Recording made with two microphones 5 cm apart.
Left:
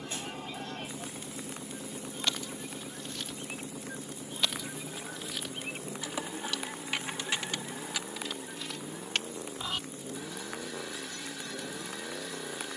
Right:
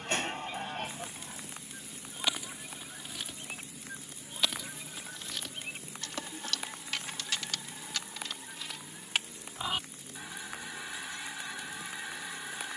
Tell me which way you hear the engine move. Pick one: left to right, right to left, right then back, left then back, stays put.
stays put.